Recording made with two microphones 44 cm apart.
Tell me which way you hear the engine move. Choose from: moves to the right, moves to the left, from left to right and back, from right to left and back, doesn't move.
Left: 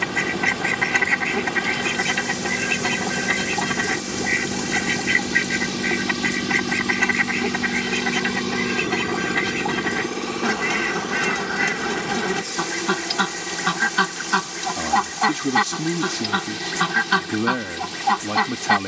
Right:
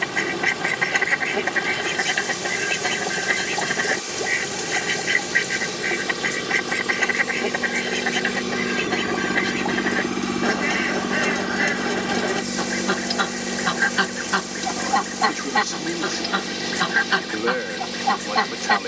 moves to the right.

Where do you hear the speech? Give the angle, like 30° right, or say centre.
50° left.